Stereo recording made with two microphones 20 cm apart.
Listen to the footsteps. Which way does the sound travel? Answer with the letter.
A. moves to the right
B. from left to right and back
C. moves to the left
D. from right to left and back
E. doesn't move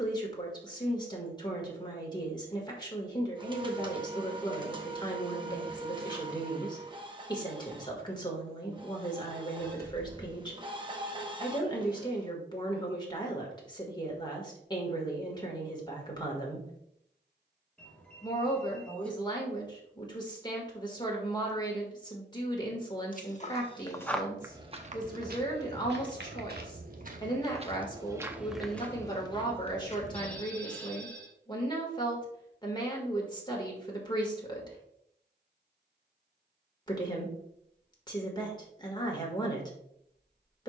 B.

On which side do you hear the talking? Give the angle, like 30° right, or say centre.
20° left.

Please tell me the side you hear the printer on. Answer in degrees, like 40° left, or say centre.
20° right.